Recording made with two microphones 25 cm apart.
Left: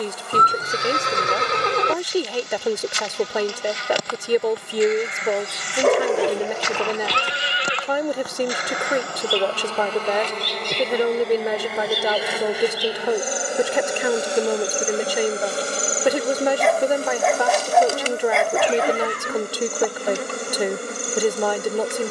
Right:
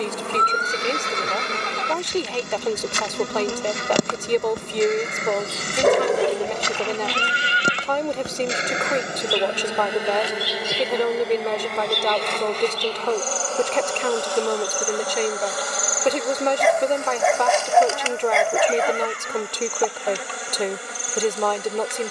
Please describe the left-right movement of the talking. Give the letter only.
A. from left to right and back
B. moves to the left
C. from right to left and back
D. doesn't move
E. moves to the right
D.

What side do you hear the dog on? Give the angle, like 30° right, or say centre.
centre.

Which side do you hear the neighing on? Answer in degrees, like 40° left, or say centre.
70° left.